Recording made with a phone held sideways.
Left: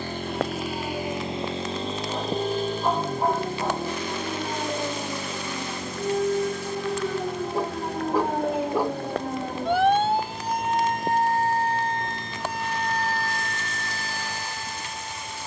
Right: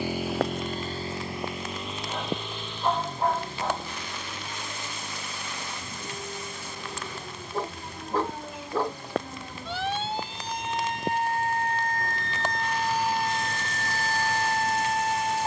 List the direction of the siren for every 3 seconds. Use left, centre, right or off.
left, left, left, left, right.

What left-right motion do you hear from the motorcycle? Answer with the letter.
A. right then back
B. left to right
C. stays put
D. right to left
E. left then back
D.